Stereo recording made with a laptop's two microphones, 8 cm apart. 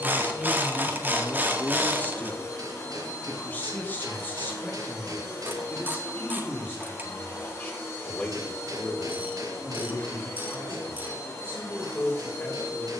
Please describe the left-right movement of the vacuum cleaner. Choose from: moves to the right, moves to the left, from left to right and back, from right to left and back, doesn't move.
doesn't move.